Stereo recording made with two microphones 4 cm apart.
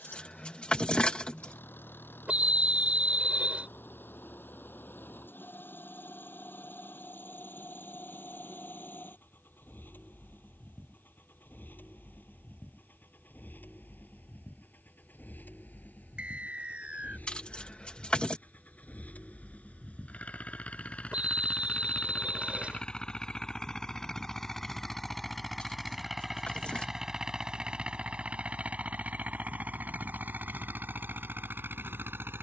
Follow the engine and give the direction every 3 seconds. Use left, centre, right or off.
left, left, left, left, left, left, left, left, centre, right, right.